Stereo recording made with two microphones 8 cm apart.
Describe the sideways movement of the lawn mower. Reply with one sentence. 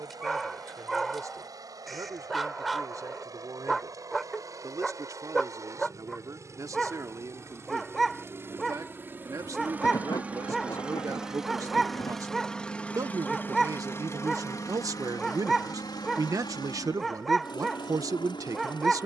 You can hear the lawn mower go from the right side to the left.